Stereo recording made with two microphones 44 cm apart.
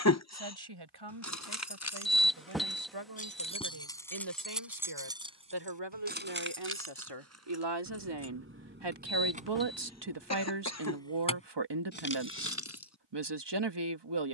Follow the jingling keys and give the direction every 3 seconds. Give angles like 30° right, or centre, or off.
30° left, centre, 30° right, centre, 30° left.